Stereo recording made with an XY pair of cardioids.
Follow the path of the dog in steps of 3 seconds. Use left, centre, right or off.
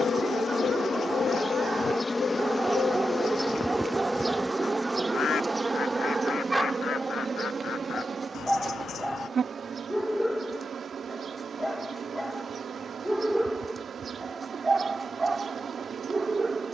right, right, centre, centre, centre, right.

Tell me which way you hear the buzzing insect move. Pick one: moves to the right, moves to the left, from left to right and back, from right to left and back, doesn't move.
moves to the right.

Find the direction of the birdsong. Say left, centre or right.
left.